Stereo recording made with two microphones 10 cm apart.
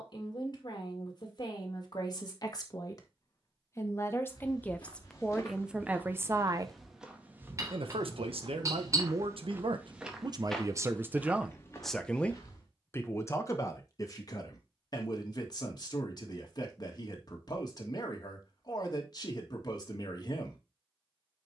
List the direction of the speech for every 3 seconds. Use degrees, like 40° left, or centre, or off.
40° left, 10° left, 60° right, 40° right, 30° left, 40° left, 40° left.